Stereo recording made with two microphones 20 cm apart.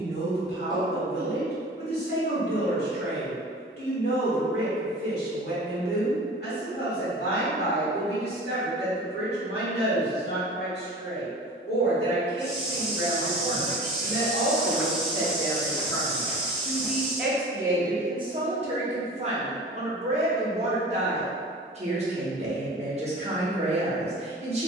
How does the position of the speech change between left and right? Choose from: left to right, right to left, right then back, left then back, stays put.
left to right.